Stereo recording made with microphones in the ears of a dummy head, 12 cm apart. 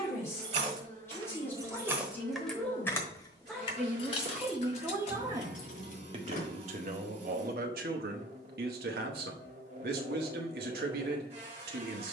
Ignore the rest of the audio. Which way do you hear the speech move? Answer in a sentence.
In this clip you hear the speech go from the left side to the right.